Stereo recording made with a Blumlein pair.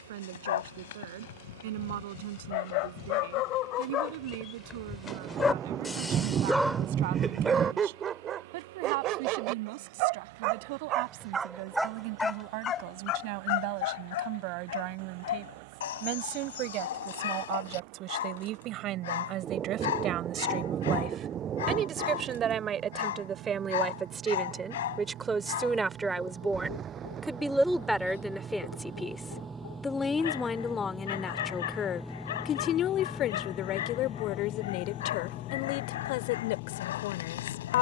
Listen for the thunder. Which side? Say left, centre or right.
right.